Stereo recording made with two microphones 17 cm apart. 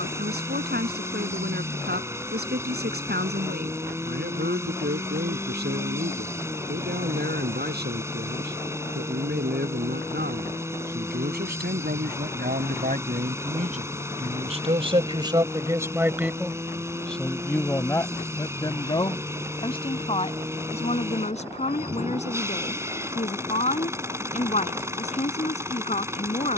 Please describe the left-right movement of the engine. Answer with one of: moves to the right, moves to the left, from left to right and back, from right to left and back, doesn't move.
doesn't move.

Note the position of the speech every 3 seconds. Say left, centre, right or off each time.
right, right, right, right, right, centre, left, left, left.